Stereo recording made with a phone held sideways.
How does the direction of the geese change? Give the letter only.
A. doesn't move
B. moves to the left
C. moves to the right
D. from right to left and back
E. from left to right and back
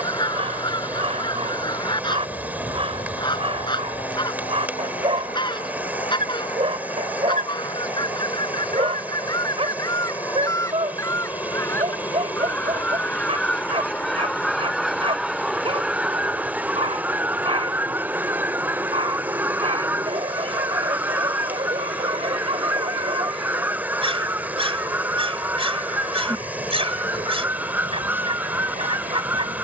C.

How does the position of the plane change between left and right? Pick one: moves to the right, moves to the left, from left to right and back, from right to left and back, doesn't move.
moves to the right.